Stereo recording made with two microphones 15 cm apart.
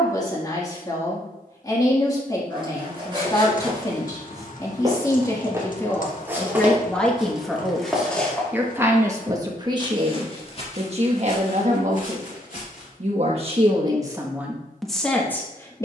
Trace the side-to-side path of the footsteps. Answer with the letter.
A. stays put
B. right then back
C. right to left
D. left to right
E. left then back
C.